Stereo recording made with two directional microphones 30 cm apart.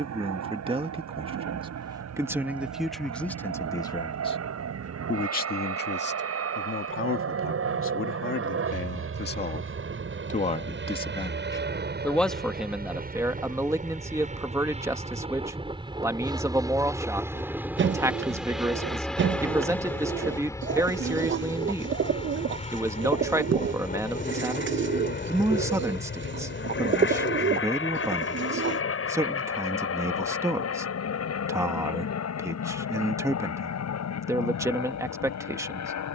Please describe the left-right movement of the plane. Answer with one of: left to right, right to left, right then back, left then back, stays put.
right to left.